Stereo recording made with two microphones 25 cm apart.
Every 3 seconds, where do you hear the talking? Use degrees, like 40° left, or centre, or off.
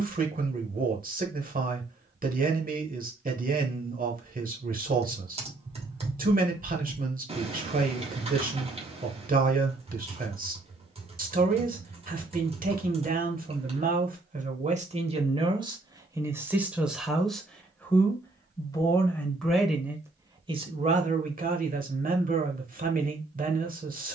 40° right, 40° right, 40° right, 40° right, 30° right, 10° right, centre, 40° right.